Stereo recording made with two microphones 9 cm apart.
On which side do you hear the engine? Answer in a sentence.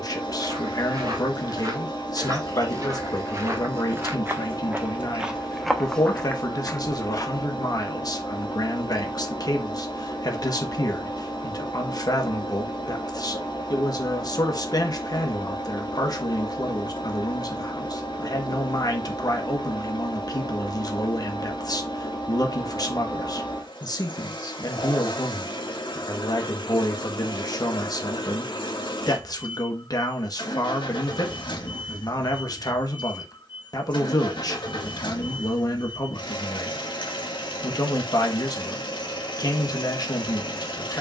In this clip you hear the engine on the left.